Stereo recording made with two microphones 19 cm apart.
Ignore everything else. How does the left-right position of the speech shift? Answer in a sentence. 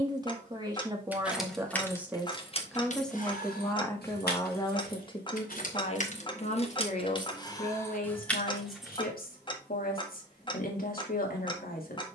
In this clip you hear the speech travel towards the left.